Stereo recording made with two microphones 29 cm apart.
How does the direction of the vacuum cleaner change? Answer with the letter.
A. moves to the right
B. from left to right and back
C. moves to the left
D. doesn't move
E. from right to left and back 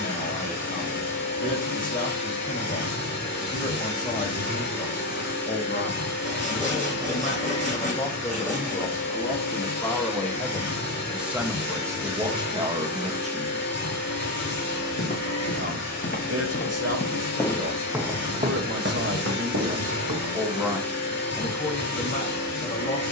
D.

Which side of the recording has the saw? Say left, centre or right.
left.